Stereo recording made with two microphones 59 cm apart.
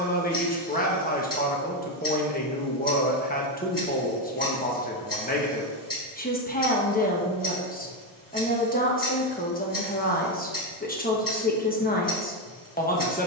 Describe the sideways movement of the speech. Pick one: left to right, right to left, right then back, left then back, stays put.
stays put.